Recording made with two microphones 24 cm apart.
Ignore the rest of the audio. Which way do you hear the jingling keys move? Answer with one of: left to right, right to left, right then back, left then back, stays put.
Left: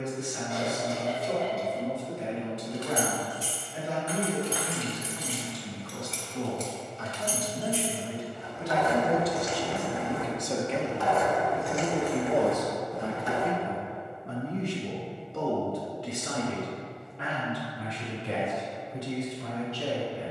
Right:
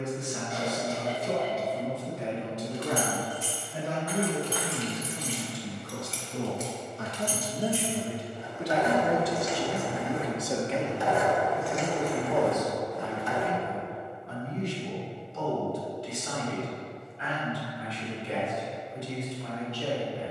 right then back.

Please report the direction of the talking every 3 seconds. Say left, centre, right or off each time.
right, right, right, centre, left, left, left.